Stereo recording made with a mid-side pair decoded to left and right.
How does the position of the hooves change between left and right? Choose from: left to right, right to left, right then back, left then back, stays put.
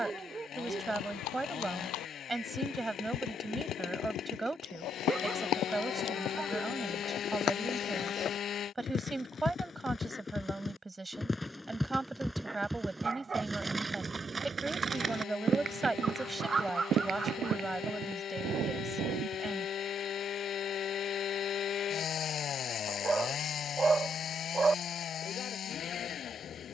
left to right.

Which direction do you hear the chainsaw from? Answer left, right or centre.
left.